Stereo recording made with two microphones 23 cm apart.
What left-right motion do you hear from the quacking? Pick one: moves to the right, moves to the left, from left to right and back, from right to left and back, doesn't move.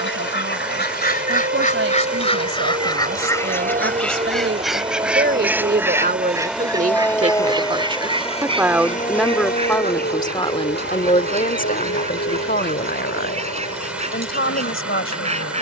moves to the right.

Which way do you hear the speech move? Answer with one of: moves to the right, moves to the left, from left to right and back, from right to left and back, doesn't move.
moves to the left.